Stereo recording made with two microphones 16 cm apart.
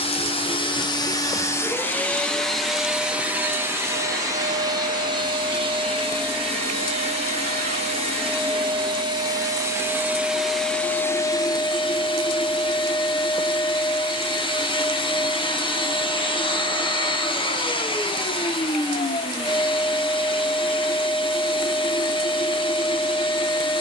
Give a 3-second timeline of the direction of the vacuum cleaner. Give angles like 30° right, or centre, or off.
20° left, 20° right, 40° right, centre, 30° left, 30° left, 30° left, 30° left.